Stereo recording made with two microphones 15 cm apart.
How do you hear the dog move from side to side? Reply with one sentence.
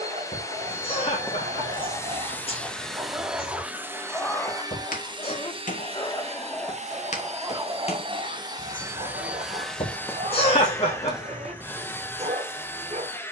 You can hear the dog move from right to left and back again.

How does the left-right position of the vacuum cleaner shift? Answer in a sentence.
In this clip you hear the vacuum cleaner move from left to right and back again.